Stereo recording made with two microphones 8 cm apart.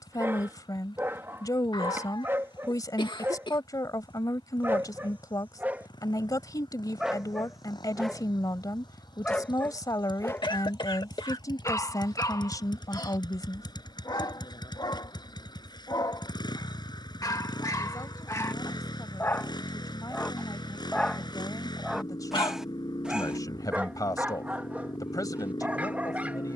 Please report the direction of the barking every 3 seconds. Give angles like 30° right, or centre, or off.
30° right, 30° right, centre, 30° left, 60° left, 50° left, 30° left, centre, 20° right.